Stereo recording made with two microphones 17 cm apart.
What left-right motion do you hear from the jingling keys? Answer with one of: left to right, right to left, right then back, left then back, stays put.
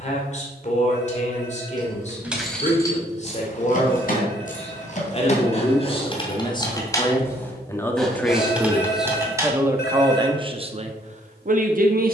left then back.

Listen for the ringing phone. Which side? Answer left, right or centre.
left.